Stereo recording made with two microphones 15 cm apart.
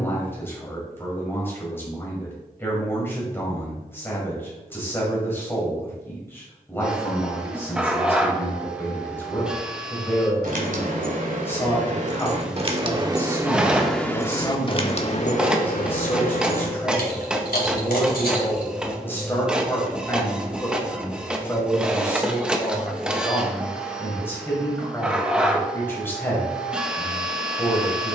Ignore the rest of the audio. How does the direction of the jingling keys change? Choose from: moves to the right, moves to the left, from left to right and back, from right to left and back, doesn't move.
moves to the left.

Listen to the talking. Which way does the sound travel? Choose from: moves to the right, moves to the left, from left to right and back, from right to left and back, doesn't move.
doesn't move.